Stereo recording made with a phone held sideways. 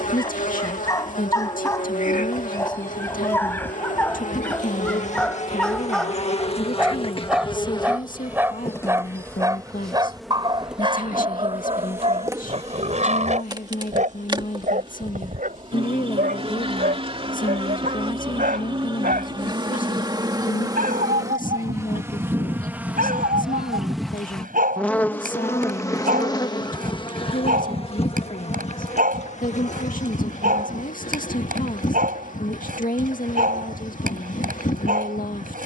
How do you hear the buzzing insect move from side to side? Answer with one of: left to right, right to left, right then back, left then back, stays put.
right then back.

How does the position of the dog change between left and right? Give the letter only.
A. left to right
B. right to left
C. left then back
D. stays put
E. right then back
A.